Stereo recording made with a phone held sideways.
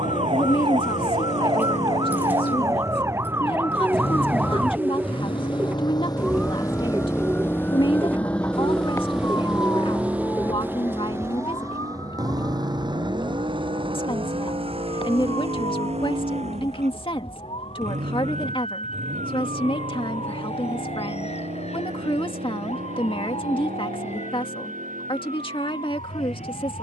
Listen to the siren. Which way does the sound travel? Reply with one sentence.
In this clip you hear the siren move to the left.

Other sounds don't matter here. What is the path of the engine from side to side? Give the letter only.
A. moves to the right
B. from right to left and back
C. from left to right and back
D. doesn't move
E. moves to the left
A.